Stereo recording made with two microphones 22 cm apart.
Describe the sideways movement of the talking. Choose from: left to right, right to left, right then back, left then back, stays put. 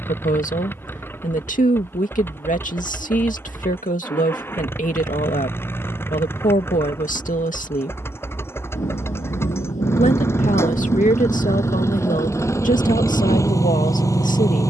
stays put.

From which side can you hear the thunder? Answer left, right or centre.
left.